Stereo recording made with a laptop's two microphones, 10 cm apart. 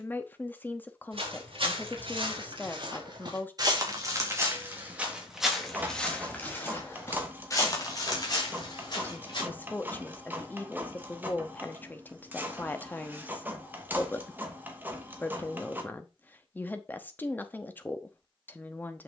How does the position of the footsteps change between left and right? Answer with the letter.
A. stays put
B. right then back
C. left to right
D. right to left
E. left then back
D.